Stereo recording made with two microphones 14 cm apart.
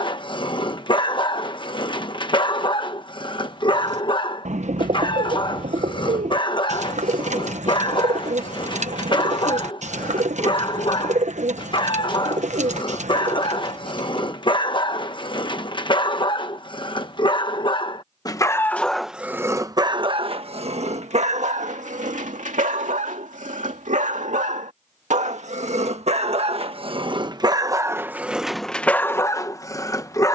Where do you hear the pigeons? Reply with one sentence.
You can hear the pigeons on the right.